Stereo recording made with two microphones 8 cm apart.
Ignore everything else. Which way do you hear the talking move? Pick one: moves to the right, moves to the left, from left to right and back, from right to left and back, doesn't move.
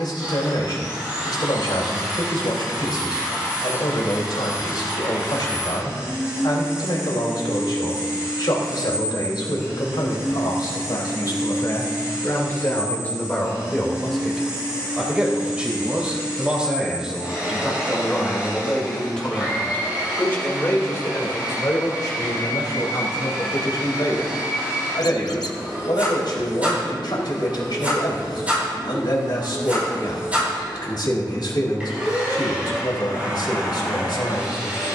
from left to right and back.